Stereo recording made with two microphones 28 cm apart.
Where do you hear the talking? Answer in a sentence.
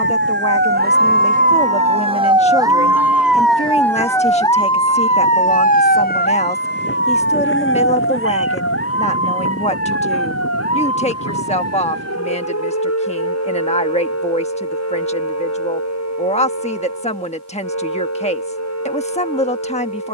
In this clip you hear the talking on the left.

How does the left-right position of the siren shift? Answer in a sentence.
In this clip you hear the siren travel towards the left.